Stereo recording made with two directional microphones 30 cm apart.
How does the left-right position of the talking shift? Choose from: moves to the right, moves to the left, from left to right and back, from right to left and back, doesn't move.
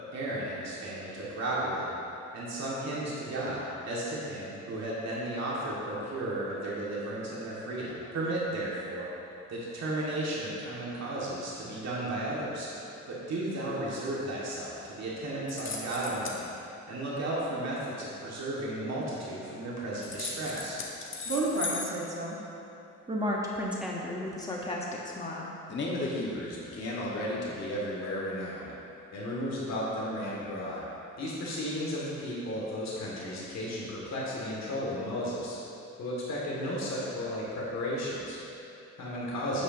moves to the left.